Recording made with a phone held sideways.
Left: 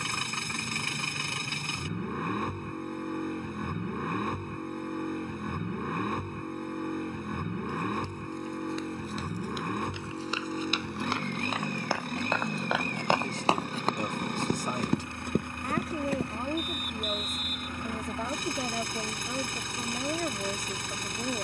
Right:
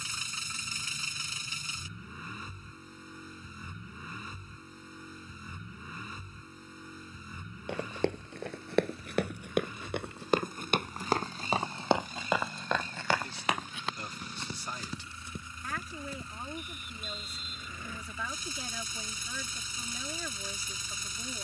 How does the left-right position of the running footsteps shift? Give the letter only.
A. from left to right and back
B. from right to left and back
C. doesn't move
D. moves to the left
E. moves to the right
D.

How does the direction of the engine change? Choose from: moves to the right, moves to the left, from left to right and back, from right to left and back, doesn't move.
doesn't move.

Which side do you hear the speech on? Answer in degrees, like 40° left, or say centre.
50° left.